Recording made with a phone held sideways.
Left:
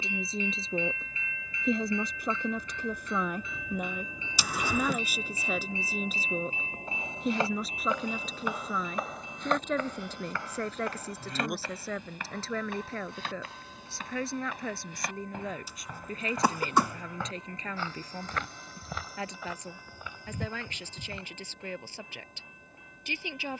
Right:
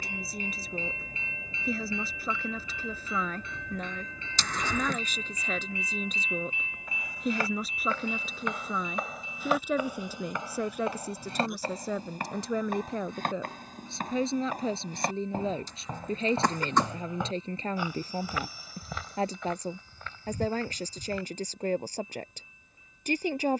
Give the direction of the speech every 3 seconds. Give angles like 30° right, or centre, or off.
20° left, 10° left, centre, 10° right, 20° right, 30° right, 40° right, 40° right.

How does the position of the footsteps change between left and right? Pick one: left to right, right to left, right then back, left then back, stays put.
right then back.